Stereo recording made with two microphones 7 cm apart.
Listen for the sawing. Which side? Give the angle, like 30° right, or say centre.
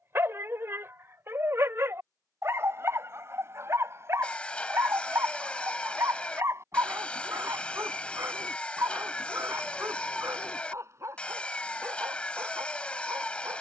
10° left.